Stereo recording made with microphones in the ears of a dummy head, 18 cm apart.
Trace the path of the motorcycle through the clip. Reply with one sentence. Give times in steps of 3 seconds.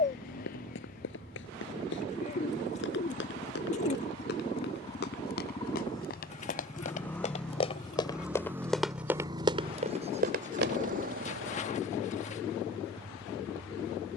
You can hear the motorcycle on the left from 0 s, in the centre from 6 s and on the right from 9 s.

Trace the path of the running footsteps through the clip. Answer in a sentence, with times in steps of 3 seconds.
You can hear the running footsteps on the left from 0 s, on the right from 9 s and not at all from 12 s.